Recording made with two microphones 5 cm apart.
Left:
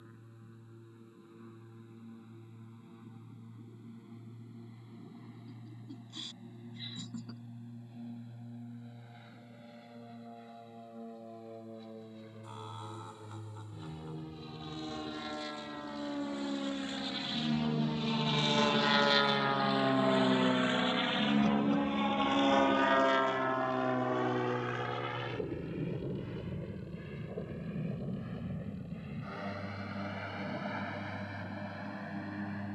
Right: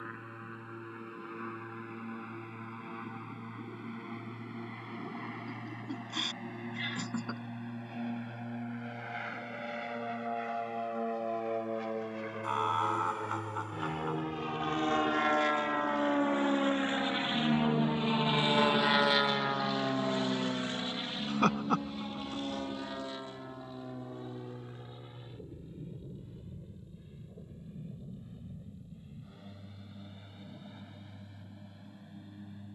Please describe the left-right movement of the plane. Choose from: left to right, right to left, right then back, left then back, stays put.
right to left.